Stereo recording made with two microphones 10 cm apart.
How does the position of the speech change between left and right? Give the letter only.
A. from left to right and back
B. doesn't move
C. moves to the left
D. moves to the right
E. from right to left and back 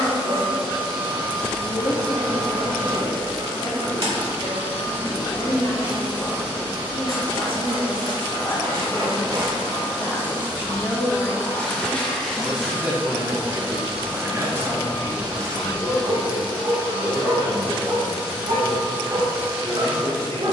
D.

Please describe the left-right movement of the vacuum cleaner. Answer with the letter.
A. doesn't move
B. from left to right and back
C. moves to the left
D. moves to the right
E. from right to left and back
A.